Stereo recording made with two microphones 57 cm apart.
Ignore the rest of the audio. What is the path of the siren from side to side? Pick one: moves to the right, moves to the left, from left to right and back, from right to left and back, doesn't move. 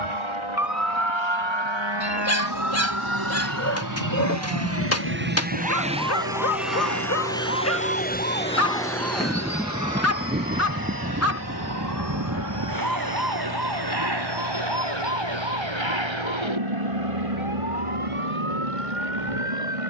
moves to the right.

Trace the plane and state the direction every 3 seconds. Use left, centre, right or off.
right, right, centre, left, left, left, left.